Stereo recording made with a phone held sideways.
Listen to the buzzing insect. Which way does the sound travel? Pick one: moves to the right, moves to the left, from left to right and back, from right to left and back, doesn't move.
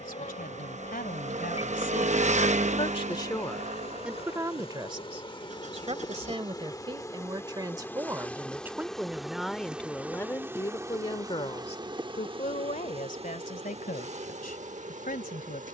moves to the right.